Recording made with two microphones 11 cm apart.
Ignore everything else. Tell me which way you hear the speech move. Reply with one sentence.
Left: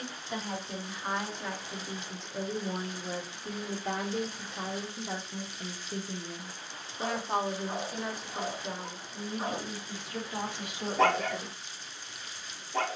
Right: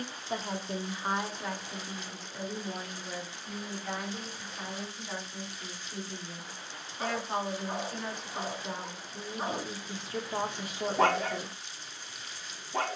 In this clip you hear the speech go left and come back.